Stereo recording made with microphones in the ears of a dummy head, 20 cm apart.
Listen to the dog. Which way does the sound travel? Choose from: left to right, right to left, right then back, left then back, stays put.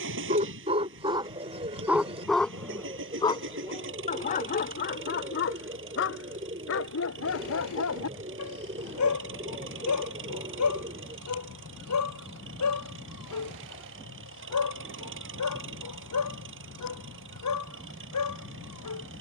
right to left.